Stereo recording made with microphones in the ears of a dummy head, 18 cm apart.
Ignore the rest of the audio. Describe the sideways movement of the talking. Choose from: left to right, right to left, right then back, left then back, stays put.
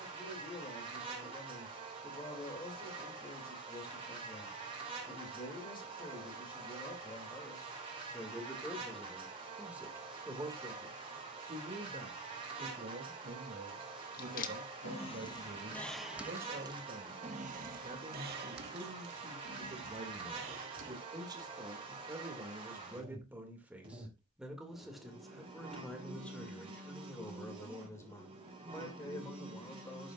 right then back.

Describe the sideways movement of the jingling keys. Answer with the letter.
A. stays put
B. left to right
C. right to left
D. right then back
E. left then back
B.